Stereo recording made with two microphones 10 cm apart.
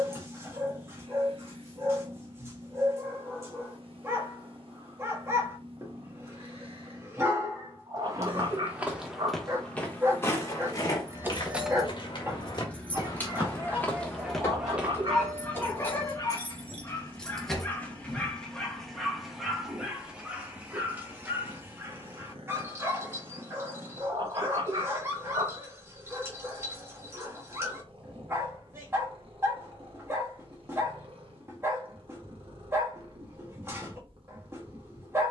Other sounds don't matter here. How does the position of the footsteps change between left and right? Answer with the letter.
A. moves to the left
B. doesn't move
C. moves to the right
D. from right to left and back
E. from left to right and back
D.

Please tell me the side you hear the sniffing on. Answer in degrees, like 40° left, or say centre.
50° right.